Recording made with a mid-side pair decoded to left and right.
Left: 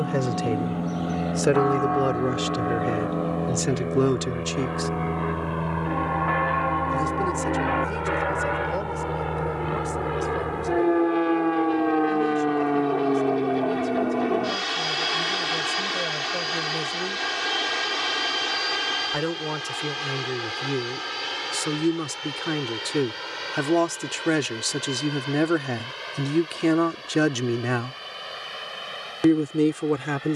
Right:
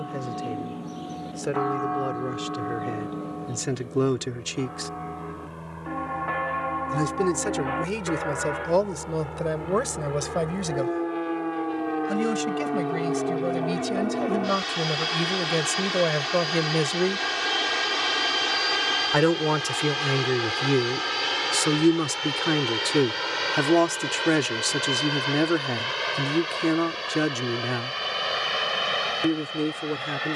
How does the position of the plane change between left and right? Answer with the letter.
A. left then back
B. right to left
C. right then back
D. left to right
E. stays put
D.